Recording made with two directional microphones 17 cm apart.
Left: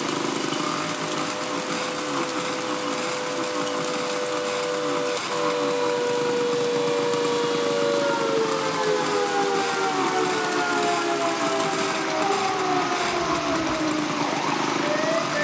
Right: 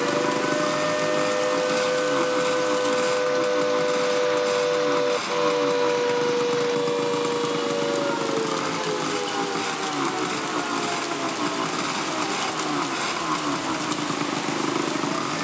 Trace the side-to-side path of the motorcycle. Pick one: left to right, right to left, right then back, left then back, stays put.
stays put.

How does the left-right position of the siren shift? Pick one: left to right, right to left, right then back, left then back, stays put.
right to left.